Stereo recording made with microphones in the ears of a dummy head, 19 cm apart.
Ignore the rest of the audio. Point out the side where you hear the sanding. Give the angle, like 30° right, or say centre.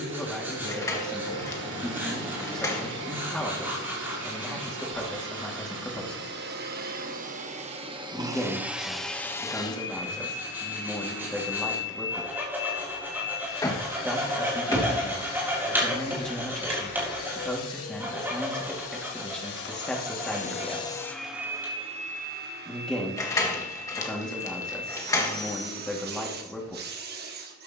10° right.